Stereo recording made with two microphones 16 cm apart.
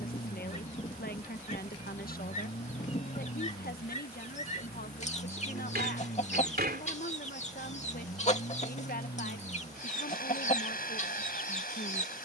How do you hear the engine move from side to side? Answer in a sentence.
You can hear the engine stay put.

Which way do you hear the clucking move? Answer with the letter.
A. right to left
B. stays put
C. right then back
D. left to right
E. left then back
B.